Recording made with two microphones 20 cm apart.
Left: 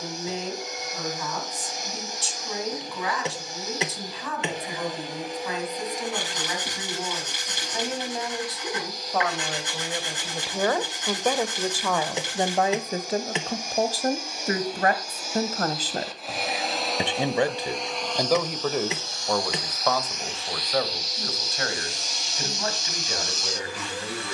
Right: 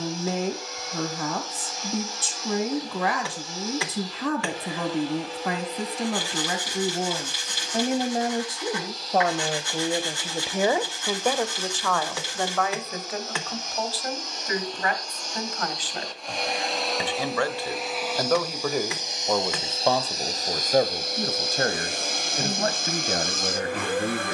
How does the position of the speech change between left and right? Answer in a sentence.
You can hear the speech go left and come back.